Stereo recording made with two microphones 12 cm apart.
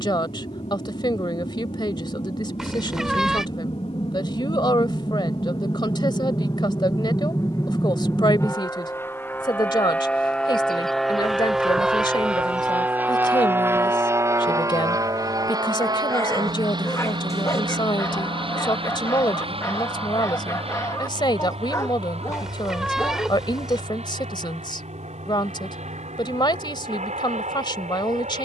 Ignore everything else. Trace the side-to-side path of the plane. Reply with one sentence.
You can hear the plane move from left to right.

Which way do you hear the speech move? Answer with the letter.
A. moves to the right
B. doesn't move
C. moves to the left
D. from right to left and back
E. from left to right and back
B.